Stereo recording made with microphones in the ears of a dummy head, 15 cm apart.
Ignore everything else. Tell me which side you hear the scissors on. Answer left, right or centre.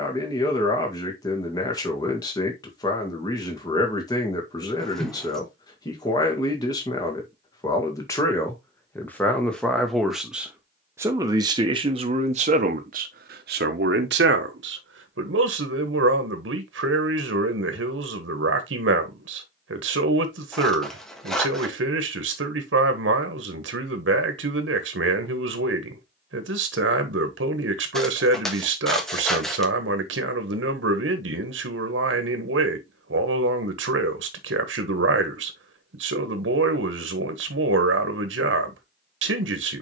centre.